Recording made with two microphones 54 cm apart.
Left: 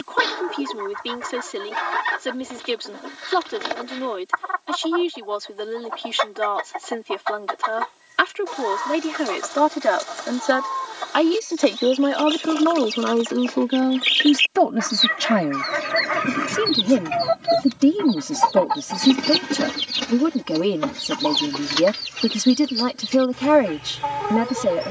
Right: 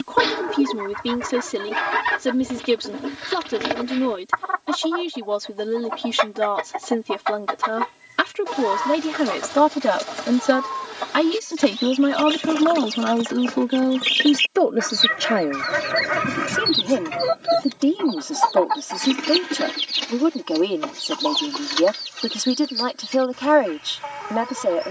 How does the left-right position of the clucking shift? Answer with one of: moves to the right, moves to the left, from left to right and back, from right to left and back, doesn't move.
moves to the left.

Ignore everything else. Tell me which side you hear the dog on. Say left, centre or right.
left.